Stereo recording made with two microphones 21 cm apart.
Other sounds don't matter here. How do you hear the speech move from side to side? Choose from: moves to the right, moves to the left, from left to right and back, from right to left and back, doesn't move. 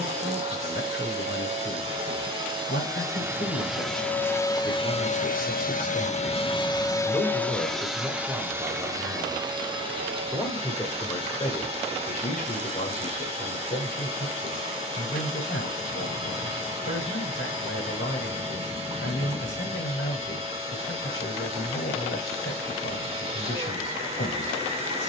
from left to right and back.